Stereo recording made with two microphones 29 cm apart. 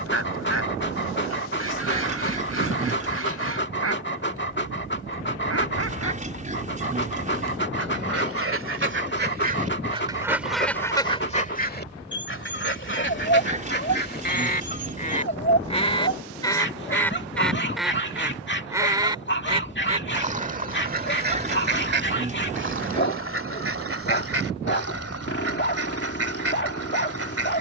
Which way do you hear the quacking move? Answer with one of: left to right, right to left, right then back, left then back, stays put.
left then back.